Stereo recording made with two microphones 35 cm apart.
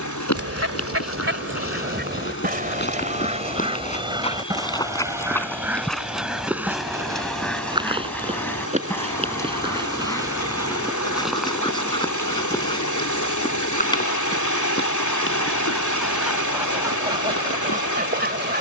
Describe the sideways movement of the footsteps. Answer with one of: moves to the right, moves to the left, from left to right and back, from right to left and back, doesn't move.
from left to right and back.